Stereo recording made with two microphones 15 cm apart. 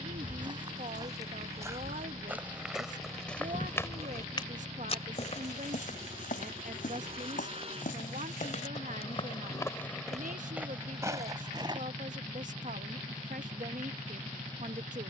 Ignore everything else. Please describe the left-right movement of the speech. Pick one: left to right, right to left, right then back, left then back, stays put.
stays put.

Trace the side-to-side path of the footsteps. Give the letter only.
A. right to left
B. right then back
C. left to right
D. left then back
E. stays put
D.